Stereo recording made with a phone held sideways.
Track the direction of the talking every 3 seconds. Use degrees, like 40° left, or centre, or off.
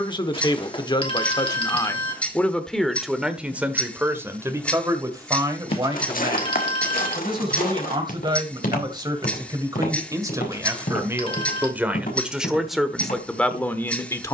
20° left, 20° right, 30° right, 20° right, centre.